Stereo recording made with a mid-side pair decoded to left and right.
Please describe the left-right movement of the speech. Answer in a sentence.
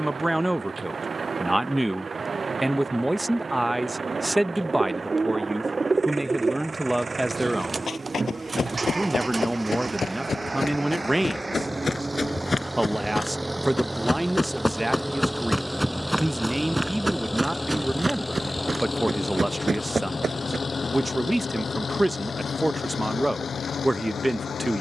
In this clip you hear the speech stay in one place.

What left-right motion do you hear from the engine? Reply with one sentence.
You can hear the engine go from the right side to the left.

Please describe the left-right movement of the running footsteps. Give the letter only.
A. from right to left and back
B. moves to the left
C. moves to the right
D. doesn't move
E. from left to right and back
C.